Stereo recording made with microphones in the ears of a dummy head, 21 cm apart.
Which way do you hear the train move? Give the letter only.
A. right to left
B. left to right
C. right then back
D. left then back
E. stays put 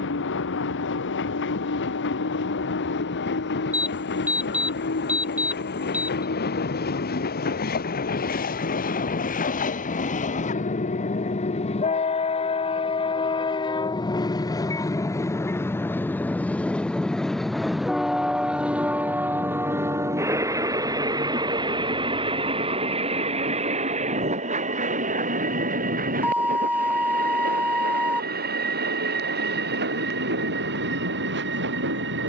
B.